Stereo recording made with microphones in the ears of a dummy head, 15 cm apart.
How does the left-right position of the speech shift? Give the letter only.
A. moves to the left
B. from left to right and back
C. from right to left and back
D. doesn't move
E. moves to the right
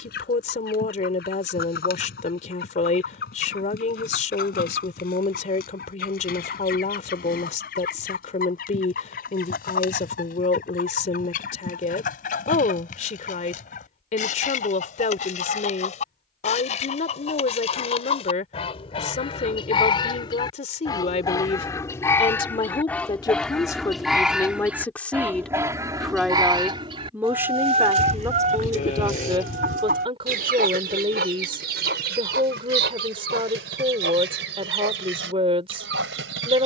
E.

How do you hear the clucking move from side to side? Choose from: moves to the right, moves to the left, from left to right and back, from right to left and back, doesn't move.
moves to the right.